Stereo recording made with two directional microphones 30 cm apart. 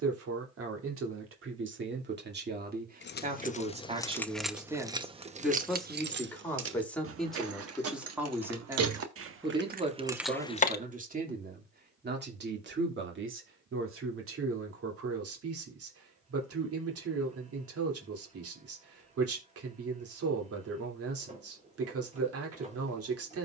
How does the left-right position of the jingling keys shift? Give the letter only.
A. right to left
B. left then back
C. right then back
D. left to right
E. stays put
C.